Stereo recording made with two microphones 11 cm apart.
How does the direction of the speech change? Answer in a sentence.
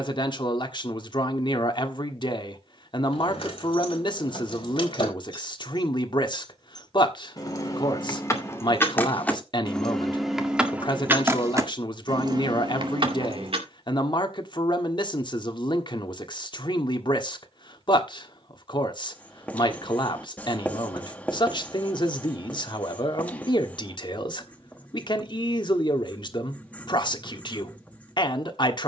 You can hear the speech stay in one place.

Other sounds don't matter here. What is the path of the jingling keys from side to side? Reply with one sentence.
In this clip you hear the jingling keys move from left to right.